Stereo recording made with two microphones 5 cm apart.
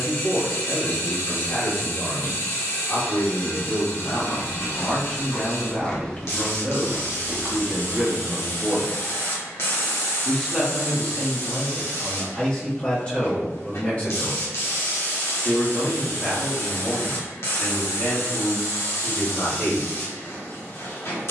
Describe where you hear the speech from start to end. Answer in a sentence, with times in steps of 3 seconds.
You can hear the speech on the left from 0 s, in the centre from 6 s and on the left from 12 s.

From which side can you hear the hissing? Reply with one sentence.
You can hear the hissing on the left.